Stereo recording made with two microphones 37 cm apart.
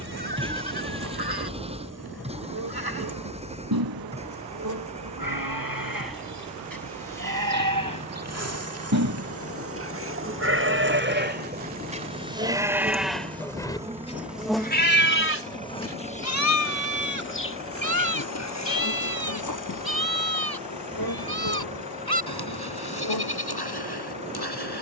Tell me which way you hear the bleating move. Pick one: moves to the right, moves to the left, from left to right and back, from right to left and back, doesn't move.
moves to the left.